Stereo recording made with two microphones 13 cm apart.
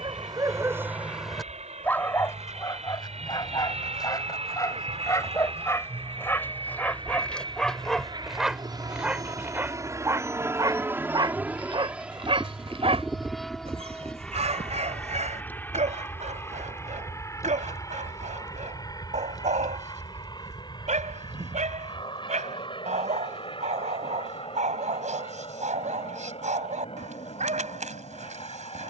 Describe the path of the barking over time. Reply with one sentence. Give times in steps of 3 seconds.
In this clip you hear the barking in the centre from 0 s, on the left from 3 s, in the centre from 6 s and on the right from 9 s.